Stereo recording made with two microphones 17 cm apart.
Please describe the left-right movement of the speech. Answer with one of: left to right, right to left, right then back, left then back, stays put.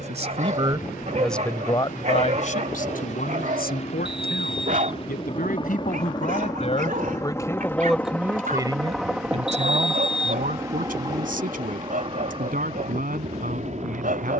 left then back.